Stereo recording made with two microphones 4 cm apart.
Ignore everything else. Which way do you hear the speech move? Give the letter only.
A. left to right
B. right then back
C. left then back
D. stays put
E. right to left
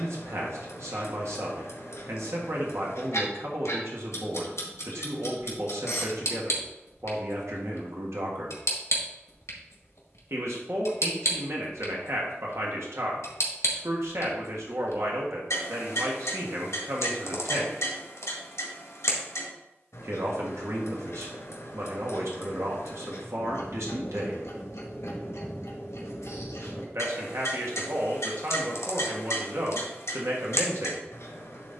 D.